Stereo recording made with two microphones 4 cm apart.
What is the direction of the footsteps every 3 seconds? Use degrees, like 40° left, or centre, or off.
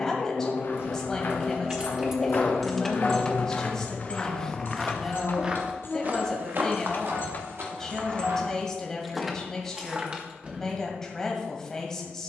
60° left, 10° left, 60° right, off.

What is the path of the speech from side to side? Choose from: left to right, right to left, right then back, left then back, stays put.
stays put.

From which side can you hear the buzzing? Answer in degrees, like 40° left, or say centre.
60° left.